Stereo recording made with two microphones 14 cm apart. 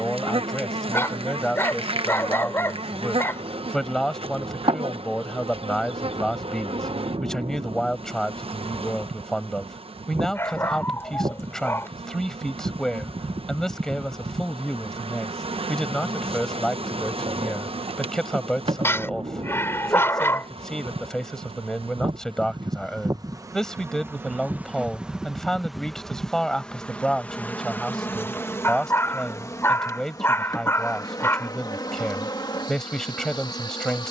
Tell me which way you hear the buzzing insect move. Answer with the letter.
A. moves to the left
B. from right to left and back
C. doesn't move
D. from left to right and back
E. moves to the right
A.